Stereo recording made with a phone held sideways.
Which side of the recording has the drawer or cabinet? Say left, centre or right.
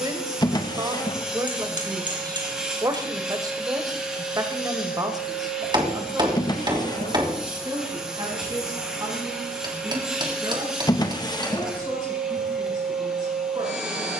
left.